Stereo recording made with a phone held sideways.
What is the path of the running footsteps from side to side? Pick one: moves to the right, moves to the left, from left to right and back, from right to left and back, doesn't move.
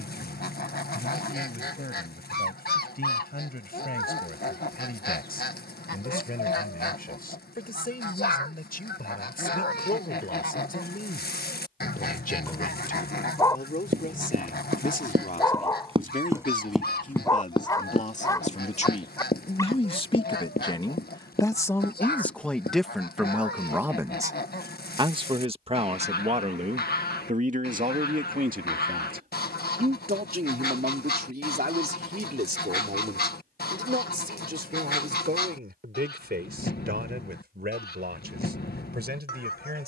moves to the left.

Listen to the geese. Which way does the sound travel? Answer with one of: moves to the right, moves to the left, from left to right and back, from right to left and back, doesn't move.
doesn't move.